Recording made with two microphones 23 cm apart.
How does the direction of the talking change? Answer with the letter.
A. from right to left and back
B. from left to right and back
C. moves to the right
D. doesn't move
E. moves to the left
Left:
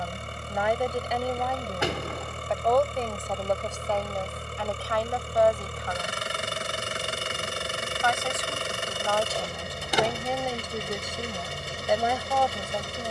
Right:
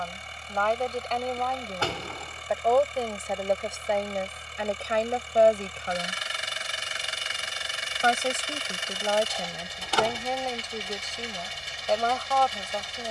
B.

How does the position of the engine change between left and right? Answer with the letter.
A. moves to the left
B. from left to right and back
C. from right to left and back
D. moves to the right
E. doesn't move
E.